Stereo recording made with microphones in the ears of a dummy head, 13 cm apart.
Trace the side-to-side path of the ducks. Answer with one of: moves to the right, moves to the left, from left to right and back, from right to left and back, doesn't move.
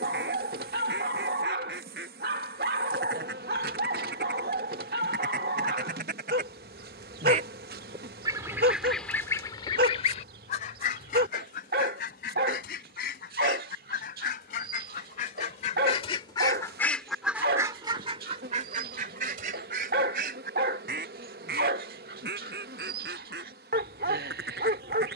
from right to left and back.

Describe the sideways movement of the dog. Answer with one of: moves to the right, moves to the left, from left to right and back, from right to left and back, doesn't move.
doesn't move.